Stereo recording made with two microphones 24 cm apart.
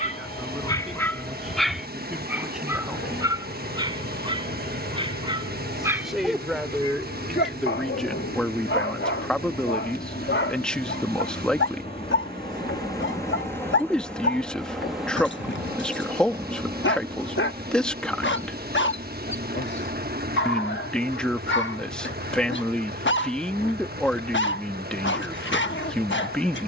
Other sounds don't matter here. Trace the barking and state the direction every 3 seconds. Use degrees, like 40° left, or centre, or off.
10° left, 20° right, 40° left, 50° left, 50° left, 50° left, 50° left, 50° left, 50° left.